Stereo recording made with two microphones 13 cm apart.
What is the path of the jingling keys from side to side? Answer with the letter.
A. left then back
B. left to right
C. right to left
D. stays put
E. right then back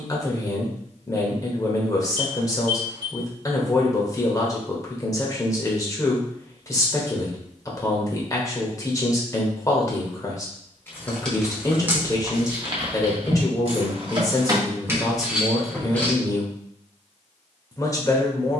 E.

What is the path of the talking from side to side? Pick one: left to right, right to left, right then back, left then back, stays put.
stays put.